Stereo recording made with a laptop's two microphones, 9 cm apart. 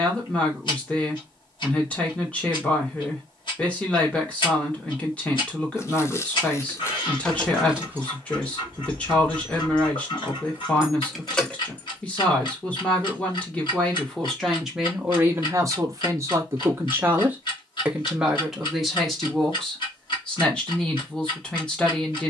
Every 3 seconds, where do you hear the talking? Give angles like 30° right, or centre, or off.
10° left, 10° left, 10° left, 10° left, 10° left, 30° right, centre, 10° left.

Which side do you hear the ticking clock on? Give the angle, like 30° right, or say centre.
70° left.